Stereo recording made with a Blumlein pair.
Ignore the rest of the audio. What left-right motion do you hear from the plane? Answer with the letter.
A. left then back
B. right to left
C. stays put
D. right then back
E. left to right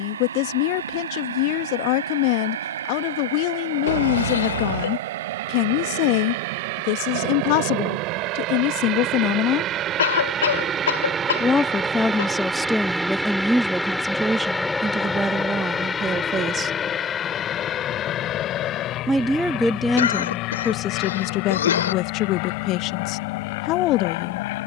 B.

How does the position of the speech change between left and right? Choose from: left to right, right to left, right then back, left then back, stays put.
right then back.